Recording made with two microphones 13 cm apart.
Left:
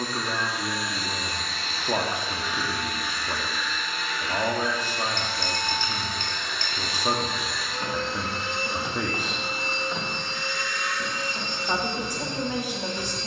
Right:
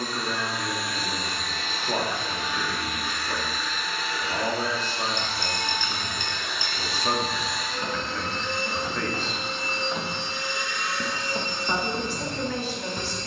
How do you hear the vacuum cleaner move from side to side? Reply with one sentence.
In this clip you hear the vacuum cleaner move from right to left and back again.